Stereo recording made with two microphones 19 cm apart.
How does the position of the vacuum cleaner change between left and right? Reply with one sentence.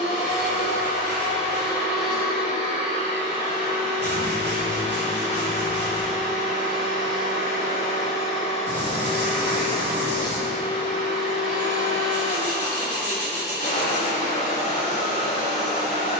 You can hear the vacuum cleaner stay put.